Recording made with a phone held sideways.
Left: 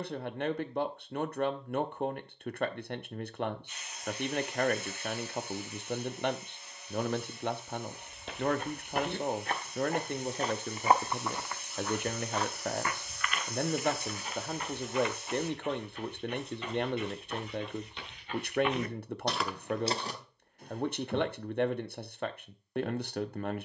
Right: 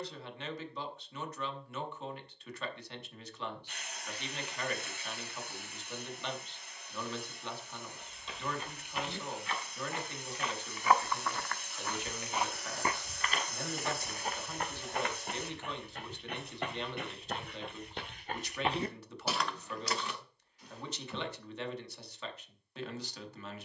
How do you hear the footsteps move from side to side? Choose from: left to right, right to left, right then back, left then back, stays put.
right then back.